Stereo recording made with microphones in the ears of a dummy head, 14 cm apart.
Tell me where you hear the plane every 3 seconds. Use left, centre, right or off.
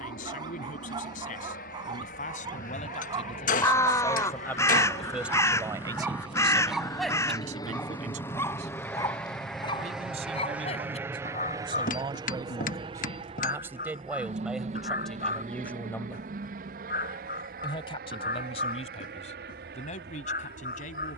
left, left, left, centre, right, right, right.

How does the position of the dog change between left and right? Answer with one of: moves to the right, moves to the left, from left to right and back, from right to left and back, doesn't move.
moves to the left.